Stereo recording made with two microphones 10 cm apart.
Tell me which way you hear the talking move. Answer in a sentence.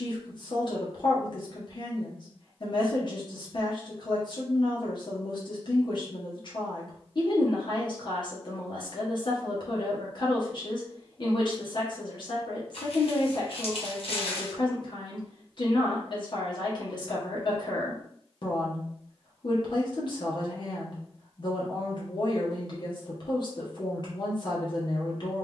You can hear the talking stay put.